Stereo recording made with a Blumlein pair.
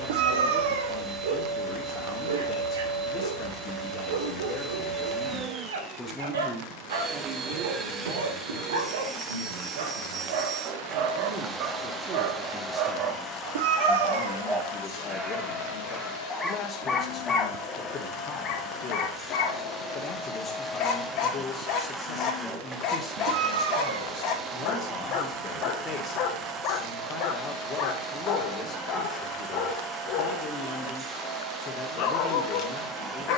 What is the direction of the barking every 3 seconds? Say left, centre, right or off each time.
right, right, right, right, right, centre, left, left, left, left, left.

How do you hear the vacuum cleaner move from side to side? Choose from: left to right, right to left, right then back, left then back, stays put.
left then back.